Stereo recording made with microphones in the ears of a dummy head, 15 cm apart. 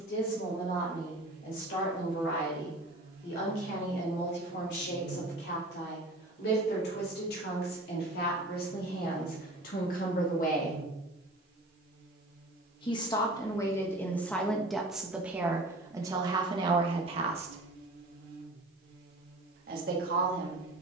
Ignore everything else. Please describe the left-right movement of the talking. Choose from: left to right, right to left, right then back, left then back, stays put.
left to right.